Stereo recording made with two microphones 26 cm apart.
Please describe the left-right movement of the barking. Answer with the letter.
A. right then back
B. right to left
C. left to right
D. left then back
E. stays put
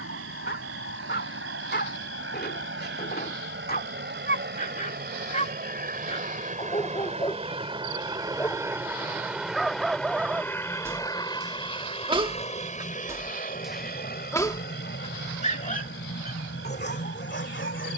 A.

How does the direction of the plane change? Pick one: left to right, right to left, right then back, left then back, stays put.
right to left.